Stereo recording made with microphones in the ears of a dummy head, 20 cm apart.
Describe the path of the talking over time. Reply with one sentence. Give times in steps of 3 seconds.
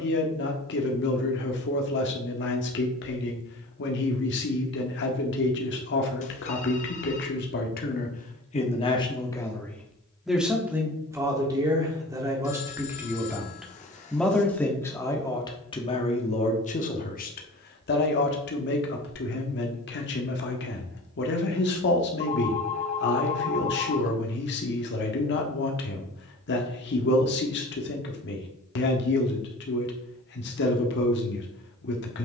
You can hear the talking on the left from 0 s, in the centre from 9 s and on the left from 15 s.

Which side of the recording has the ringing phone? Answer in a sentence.
In this clip you hear the ringing phone on the left.